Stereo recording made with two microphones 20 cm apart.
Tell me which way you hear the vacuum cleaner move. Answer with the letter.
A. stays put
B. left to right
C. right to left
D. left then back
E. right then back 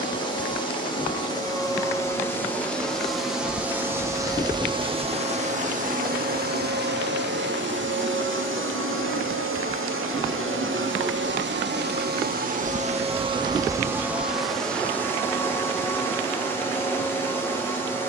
E.